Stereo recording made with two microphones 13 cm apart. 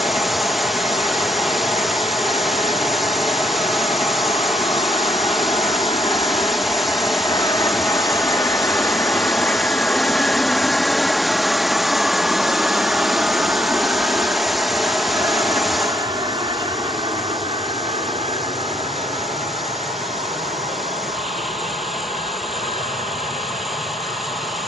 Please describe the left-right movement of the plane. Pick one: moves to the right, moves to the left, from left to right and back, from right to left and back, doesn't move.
moves to the right.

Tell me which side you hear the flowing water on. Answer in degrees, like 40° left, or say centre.
centre.